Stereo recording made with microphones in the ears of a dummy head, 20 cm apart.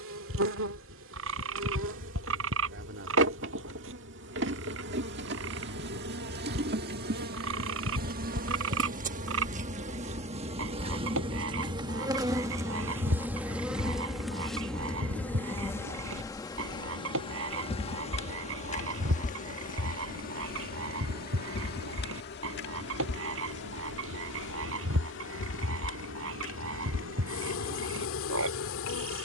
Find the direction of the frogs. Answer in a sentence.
You can hear the frogs on the right.